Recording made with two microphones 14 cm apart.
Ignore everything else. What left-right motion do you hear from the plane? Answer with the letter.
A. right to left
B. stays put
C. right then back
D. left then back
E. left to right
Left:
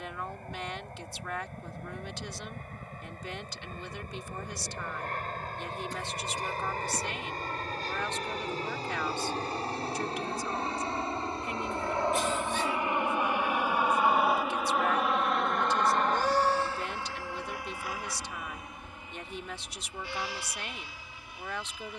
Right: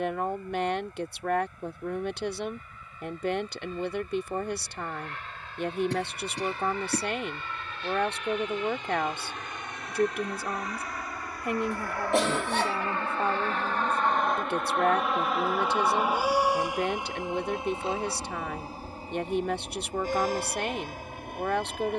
E.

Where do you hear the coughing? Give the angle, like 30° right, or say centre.
70° right.